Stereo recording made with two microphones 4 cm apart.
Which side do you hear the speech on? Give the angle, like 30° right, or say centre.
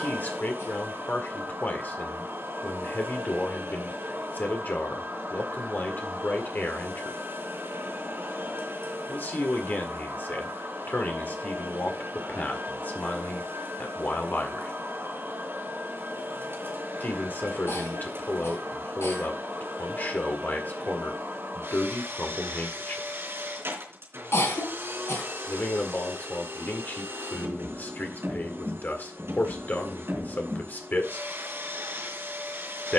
40° left.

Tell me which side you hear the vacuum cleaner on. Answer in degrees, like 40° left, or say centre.
60° right.